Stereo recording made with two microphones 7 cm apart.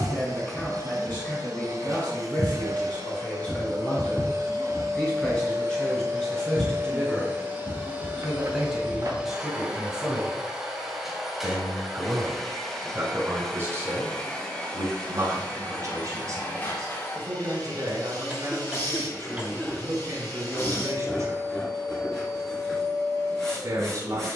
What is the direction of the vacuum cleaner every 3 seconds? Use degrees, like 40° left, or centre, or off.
50° right, 50° right, 30° right, 10° right, 10° left, 30° left, 30° left, 30° left.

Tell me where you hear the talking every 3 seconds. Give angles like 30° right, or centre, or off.
20° left, 20° left, 10° left, 10° right, 30° right, 50° right, 50° right, 50° right.